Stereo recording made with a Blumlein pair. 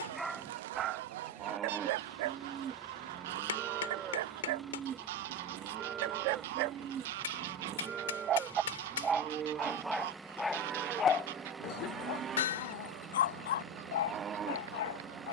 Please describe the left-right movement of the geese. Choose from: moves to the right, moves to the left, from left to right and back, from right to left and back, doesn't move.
doesn't move.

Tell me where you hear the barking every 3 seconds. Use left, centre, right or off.
right, right, right, centre, left.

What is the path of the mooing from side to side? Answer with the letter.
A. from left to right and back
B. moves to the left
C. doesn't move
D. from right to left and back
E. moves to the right
C.